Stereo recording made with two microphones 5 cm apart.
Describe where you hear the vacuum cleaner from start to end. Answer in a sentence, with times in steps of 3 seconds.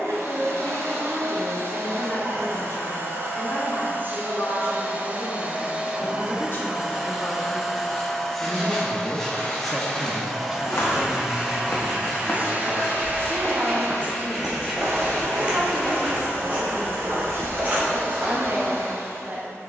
You can hear the vacuum cleaner on the right from 0 s, in the centre from 6 s and on the right from 12 s.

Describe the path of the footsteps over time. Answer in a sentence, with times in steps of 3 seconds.
You can hear the footsteps not at all from 0 s, on the left from 9 s, in the centre from 12 s and on the right from 15 s.